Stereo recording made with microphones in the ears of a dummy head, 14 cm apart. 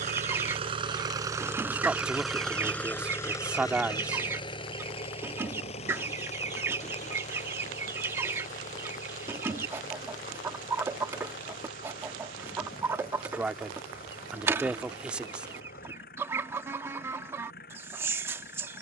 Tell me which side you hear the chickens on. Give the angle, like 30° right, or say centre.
20° right.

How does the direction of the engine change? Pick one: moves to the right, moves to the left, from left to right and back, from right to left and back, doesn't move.
moves to the left.